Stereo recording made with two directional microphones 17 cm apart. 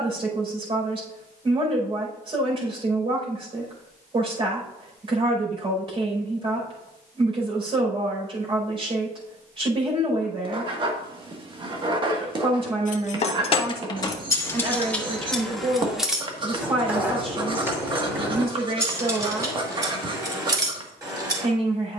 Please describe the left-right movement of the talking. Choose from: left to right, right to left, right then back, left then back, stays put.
stays put.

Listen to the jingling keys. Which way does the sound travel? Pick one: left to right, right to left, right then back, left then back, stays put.
left to right.